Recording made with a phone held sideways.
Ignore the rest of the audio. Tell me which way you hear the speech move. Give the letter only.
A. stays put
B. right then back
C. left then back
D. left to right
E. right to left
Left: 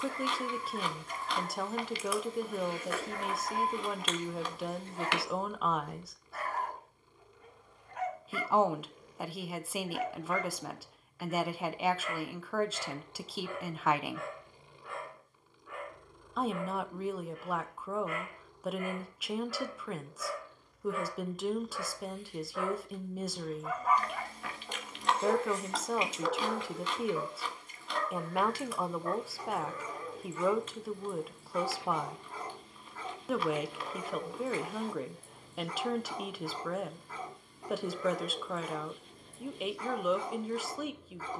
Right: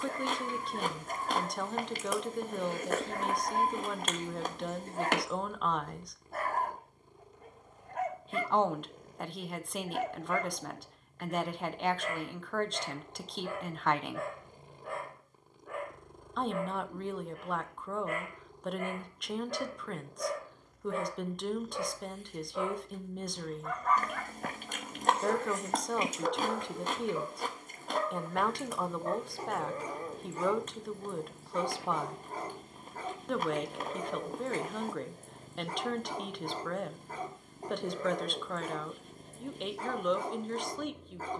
A.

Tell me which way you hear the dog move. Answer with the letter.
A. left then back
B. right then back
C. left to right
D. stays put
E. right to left
A.